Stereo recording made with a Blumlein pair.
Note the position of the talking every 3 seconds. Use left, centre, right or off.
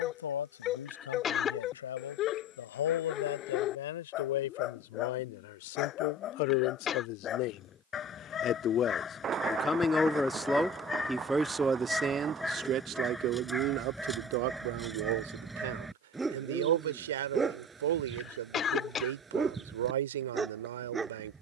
left, left, left, centre, right, right, right.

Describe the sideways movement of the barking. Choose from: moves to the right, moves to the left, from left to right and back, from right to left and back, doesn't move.
moves to the right.